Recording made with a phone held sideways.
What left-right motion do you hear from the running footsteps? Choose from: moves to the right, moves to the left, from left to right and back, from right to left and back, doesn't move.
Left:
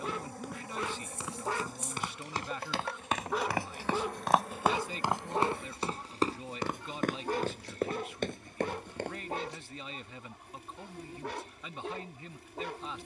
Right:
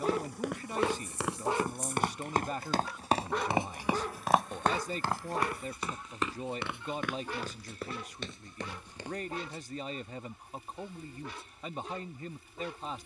moves to the left.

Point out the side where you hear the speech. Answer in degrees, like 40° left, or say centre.
40° right.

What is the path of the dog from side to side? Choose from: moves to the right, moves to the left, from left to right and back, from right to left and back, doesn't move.
moves to the left.